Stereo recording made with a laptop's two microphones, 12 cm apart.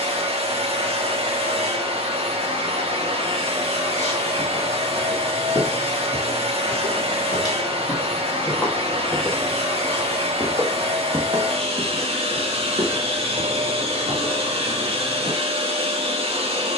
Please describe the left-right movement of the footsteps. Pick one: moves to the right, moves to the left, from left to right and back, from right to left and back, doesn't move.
moves to the right.